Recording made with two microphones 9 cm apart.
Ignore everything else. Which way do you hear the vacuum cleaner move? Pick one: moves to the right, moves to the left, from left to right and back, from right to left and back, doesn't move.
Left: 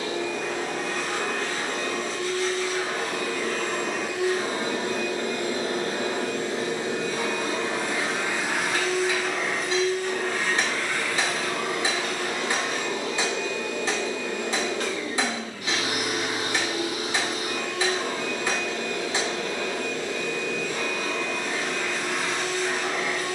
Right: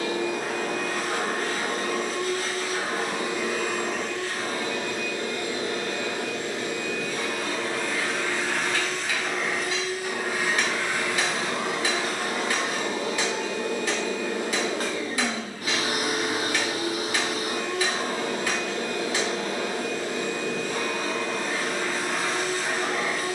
from right to left and back.